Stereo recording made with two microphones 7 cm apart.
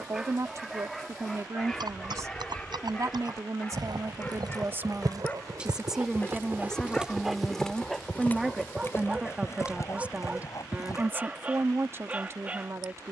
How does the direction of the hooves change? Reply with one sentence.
You can hear the hooves move from right to left.